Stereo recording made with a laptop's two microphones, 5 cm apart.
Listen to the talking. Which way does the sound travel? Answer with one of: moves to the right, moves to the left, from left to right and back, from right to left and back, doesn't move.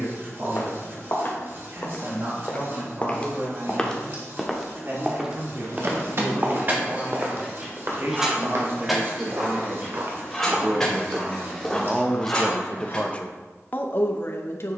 moves to the left.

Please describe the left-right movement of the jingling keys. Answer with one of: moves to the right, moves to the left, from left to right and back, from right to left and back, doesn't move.
moves to the left.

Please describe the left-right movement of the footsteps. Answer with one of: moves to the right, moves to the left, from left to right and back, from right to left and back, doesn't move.
from left to right and back.